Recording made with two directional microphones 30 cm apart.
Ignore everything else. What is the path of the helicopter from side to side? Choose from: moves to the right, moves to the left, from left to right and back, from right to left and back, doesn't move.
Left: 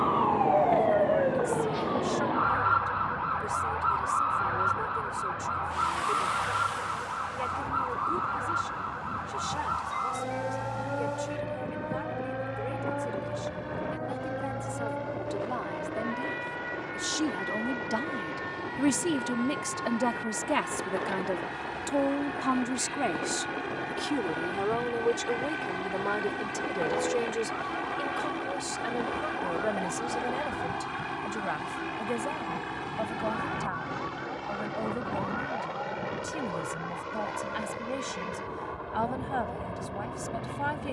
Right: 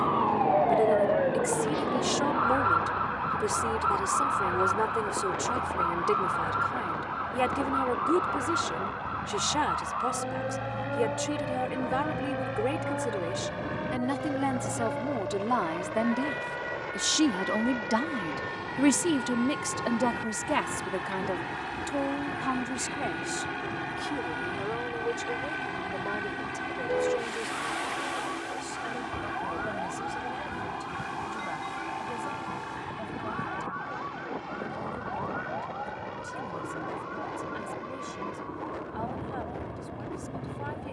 moves to the left.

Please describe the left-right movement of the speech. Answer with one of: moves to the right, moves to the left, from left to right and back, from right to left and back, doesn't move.
moves to the left.